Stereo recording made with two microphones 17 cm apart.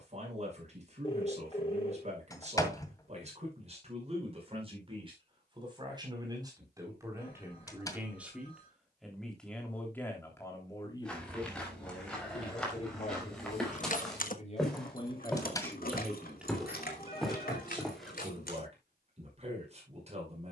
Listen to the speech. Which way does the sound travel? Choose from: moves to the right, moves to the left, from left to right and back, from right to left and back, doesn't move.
from right to left and back.